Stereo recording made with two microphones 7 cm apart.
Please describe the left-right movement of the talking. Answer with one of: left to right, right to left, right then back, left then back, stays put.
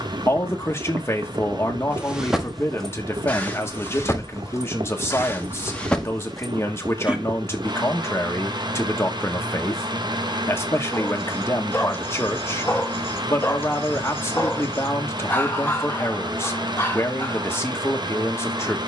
stays put.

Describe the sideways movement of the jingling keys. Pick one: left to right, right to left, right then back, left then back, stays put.
left then back.